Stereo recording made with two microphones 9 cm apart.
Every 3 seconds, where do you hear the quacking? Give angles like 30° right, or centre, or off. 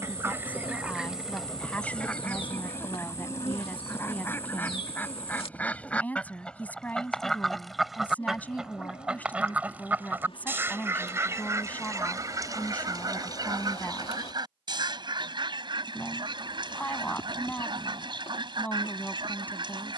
centre, 20° left, centre, 20° right, 50° right, 60° right, 60° right.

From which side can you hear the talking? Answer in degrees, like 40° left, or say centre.
20° left.